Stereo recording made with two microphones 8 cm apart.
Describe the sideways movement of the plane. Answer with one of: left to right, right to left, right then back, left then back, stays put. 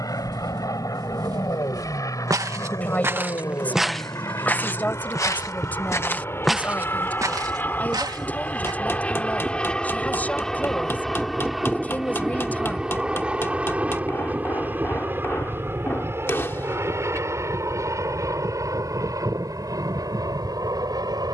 left to right.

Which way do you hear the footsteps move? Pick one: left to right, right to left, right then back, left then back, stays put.
left then back.